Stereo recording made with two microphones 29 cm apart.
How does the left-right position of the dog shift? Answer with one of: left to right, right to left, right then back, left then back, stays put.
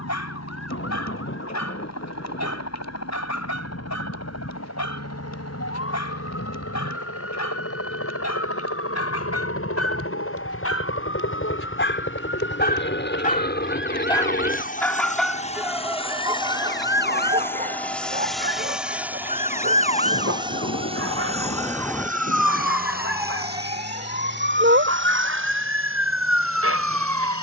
left to right.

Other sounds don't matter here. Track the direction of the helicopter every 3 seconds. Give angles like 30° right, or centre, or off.
70° left, 70° left, 60° left, 50° left, 40° left, 20° left, 10° right, 30° right, 40° right.